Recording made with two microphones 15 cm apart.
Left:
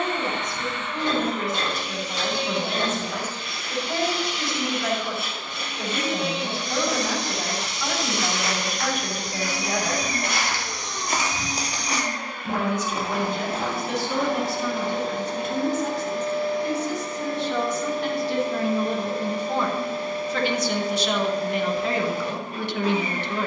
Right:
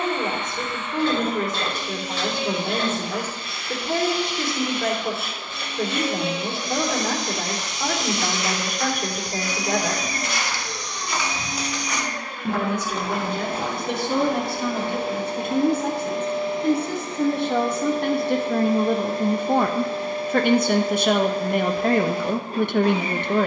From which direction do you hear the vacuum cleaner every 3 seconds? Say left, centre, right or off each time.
left, left, left, left, centre, right, right, right.